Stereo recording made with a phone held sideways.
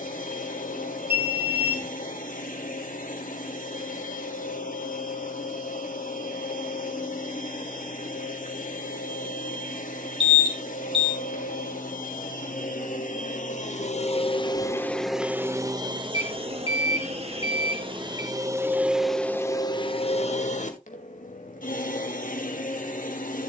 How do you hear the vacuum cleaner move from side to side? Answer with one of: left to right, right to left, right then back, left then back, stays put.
right then back.